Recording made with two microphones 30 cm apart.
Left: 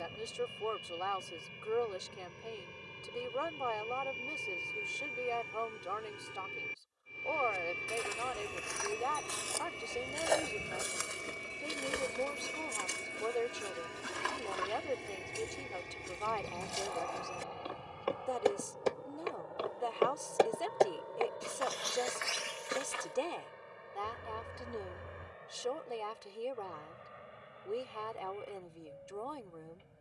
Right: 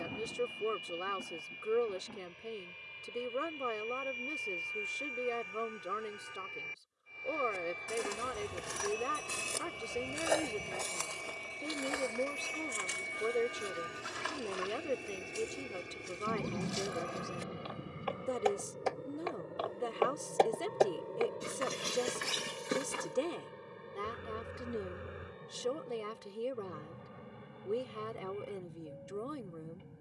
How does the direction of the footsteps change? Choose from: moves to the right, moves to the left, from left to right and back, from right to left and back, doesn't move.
from right to left and back.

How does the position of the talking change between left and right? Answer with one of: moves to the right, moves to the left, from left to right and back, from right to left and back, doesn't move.
doesn't move.